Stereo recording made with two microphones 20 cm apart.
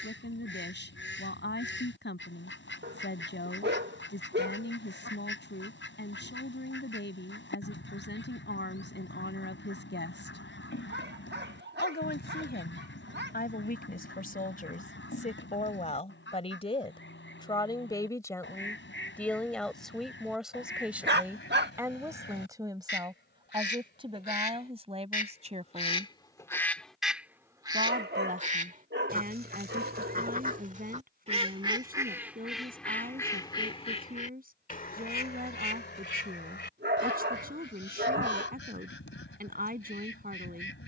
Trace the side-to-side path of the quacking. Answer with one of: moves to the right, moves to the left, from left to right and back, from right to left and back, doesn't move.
from left to right and back.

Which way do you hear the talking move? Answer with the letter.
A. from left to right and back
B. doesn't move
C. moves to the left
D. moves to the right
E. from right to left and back
D.